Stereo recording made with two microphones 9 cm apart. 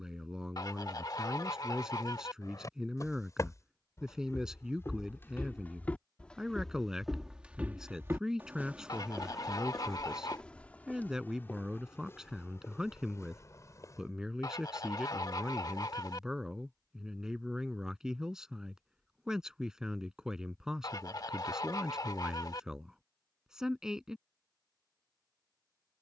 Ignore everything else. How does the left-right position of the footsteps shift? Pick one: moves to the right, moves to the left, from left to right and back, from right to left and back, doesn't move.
from left to right and back.